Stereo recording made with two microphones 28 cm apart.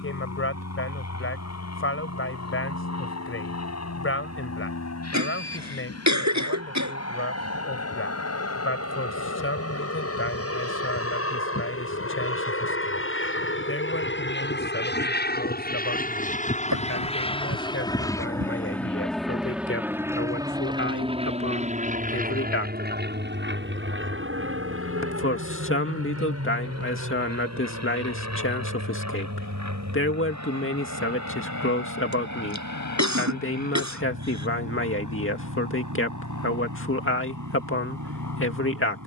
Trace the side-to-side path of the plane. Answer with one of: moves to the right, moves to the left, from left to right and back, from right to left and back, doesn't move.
moves to the right.